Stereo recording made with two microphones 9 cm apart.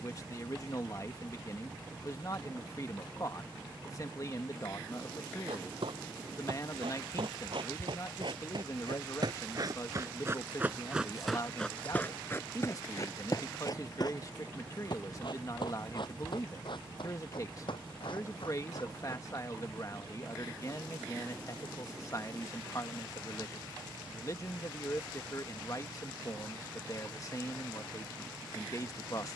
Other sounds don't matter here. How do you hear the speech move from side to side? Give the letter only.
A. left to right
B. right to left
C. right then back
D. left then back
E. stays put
E.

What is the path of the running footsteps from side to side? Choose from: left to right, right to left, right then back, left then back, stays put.
right to left.